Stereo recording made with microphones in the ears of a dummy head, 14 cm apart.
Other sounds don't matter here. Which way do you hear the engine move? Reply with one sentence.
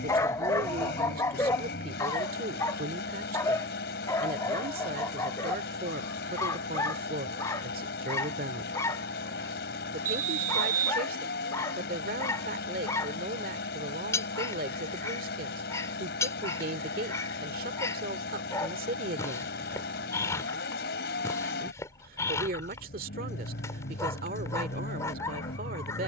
In this clip you hear the engine stay in one place.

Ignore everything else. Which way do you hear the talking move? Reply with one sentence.
You can hear the talking stay in one place.